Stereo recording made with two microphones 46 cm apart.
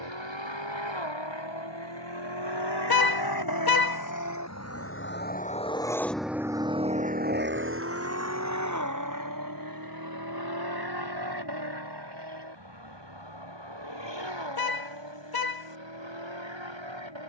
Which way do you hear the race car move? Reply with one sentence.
In this clip you hear the race car move from left to right.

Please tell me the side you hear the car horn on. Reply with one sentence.
You can hear the car horn on the left.